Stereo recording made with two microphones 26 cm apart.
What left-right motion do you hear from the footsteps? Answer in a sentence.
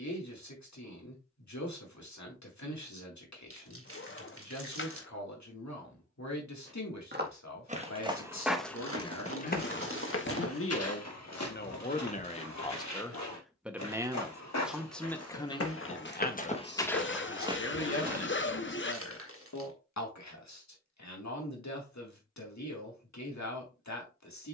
You can hear the footsteps go left and come back.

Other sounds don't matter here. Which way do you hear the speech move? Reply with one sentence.
In this clip you hear the speech move from left to right and back again.